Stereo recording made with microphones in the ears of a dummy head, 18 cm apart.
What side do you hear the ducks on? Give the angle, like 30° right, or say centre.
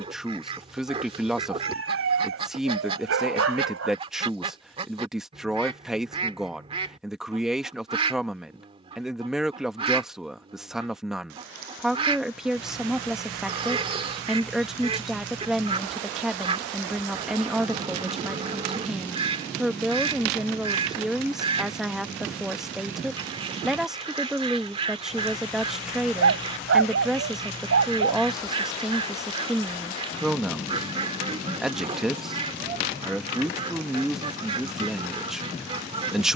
30° right.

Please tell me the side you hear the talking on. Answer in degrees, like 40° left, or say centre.
centre.